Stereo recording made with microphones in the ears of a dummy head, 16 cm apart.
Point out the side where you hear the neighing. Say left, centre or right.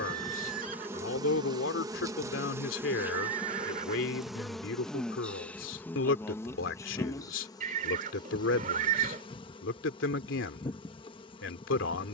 right.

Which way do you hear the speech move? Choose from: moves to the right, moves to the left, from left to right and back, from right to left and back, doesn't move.
doesn't move.